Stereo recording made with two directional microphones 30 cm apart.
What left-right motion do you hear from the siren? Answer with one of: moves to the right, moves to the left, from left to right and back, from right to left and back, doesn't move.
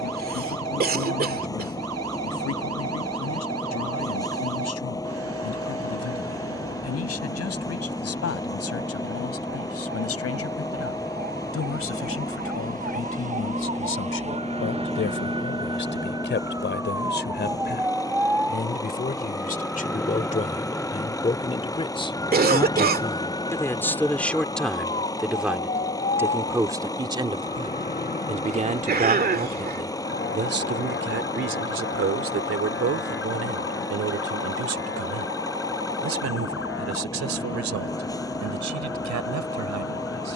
moves to the left.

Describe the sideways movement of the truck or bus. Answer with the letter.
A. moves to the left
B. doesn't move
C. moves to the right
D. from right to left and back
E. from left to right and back
B.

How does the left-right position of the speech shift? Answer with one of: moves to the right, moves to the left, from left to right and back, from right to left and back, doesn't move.
moves to the right.